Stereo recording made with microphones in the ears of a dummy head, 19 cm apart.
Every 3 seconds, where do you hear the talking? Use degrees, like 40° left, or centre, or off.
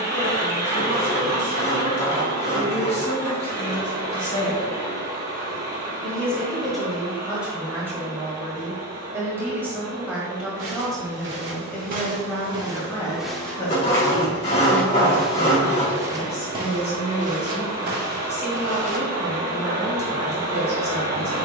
40° left, 20° left, 10° right, centre, 20° left, 30° left, 30° left.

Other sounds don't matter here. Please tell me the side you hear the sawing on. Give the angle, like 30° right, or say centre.
30° left.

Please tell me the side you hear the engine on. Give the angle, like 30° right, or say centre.
20° right.